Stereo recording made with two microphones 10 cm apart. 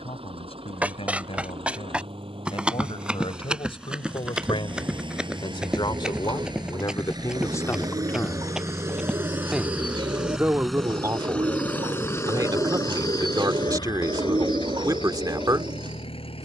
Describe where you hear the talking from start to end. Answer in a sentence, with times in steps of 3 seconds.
In this clip you hear the talking on the left from 0 s and on the right from 9 s.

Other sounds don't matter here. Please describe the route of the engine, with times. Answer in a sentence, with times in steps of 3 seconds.
You can hear the engine on the right from 0 s, in the centre from 9 s and on the left from 12 s.